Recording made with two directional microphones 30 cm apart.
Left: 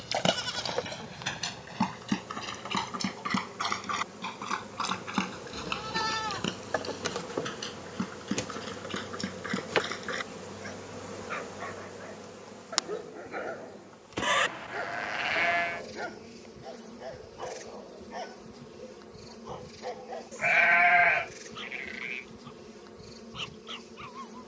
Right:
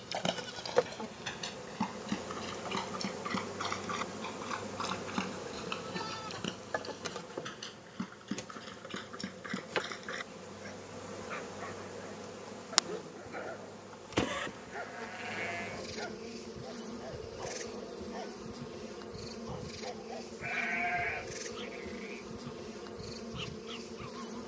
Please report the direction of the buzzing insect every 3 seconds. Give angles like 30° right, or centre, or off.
20° right, 20° right, 40° left, 30° left, 10° right, 20° right, 20° right, 20° right.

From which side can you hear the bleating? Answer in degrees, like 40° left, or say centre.
70° left.